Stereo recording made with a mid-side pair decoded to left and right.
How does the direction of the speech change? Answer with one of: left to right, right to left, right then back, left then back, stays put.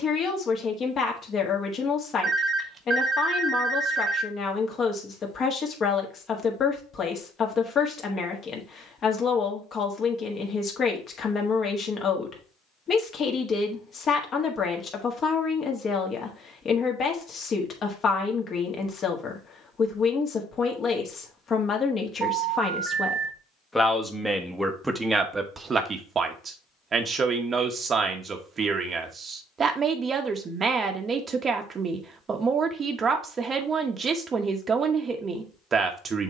left to right.